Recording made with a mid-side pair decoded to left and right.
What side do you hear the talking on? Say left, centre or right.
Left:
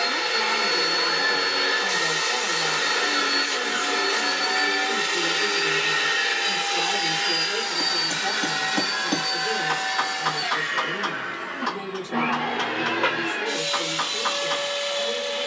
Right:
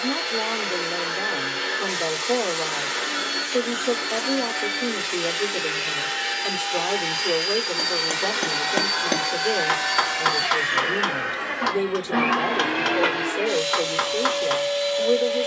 right.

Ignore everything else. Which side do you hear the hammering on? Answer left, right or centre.
right.